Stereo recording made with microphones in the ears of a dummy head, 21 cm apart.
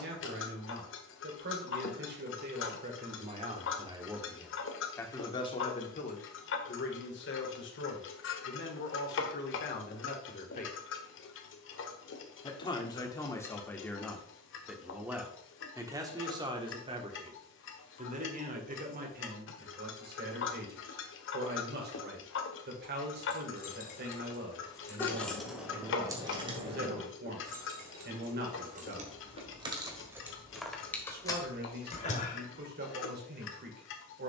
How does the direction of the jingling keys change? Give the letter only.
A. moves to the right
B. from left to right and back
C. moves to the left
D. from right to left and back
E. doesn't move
B.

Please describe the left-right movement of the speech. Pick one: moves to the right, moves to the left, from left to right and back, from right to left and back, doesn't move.
from right to left and back.